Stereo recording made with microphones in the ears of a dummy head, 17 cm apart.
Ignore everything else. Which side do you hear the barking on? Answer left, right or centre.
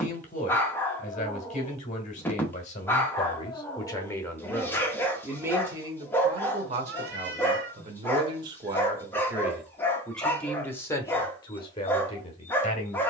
centre.